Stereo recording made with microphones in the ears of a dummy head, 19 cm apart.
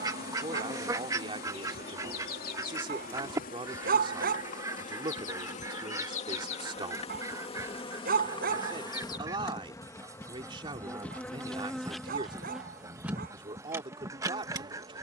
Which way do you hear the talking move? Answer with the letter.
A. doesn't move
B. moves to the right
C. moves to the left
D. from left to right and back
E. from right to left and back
A.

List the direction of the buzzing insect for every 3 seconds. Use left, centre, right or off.
left, left, left, centre, centre.